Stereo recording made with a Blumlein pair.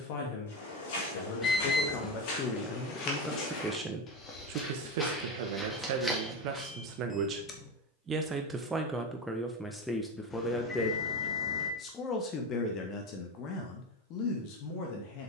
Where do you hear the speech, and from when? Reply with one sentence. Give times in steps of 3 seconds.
You can hear the speech on the left from 0 s, on the right from 3 s, in the centre from 9 s and on the left from 12 s.